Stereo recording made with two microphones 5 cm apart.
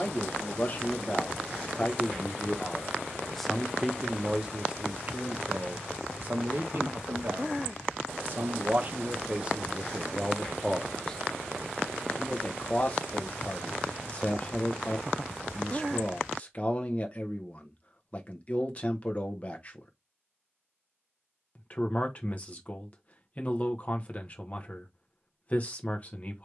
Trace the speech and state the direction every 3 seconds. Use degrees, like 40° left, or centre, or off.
30° left, 20° right, 40° right, 10° right, 30° left, 30° left, 30° left, 30° left, 30° left.